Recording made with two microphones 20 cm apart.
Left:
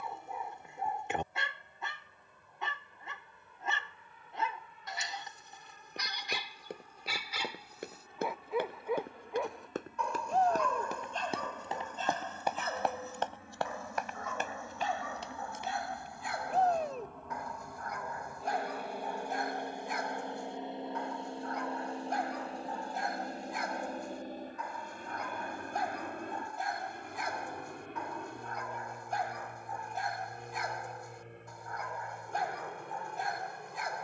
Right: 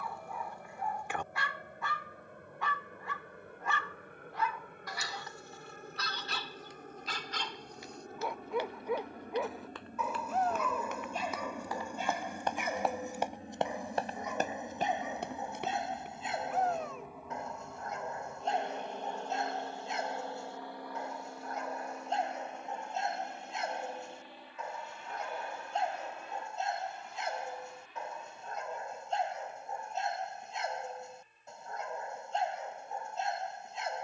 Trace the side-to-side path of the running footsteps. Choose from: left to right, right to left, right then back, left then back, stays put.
left to right.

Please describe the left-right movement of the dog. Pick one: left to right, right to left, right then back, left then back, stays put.
left to right.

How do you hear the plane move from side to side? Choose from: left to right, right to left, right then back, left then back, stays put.
right to left.